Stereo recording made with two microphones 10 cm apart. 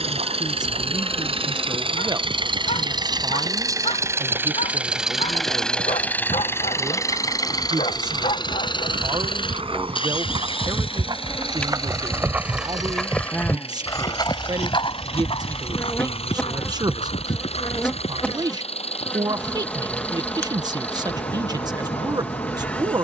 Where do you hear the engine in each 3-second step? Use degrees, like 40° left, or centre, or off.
60° right, 20° right, 30° left, 60° left, 60° left, 70° left, 70° left, 70° left.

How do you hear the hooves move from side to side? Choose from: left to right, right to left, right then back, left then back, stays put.
right to left.